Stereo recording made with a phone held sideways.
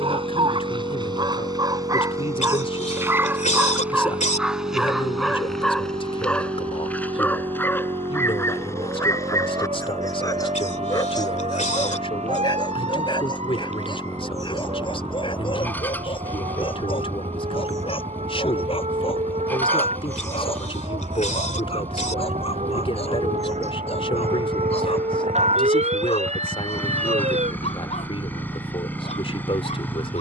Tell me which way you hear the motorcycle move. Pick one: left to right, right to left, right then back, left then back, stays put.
stays put.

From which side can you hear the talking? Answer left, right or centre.
left.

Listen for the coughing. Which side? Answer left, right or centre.
left.